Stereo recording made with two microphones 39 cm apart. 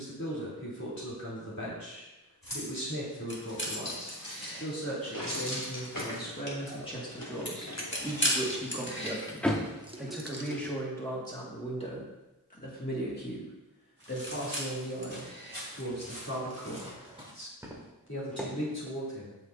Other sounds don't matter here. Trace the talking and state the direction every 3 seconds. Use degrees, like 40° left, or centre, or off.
50° left, 40° left, centre, centre, 30° left, 40° left, 50° left.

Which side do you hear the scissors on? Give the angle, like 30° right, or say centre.
30° left.